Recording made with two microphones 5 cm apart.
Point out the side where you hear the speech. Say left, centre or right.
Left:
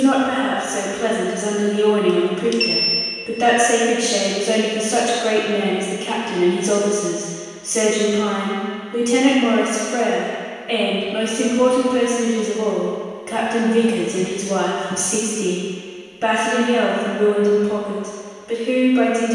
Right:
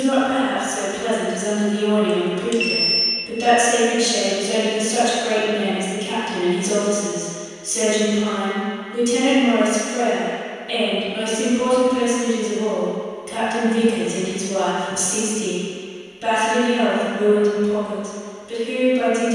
left.